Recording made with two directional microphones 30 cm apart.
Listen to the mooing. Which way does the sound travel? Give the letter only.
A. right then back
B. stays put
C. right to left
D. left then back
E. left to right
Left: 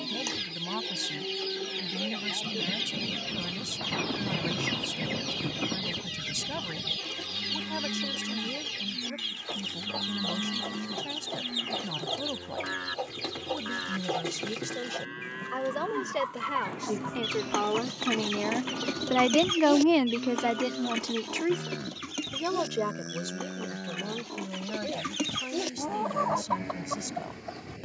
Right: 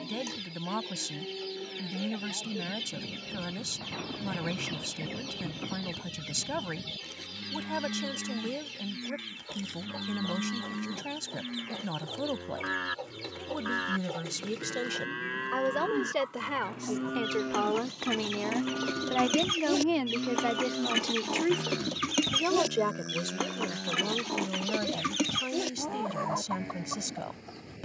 A.